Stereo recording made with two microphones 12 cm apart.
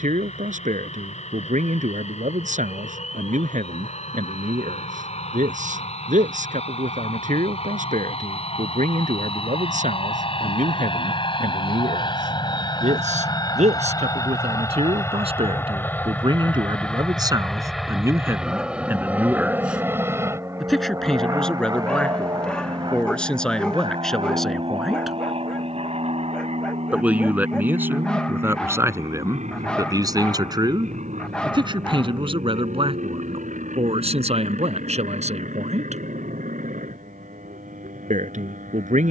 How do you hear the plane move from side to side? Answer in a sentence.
In this clip you hear the plane move from left to right.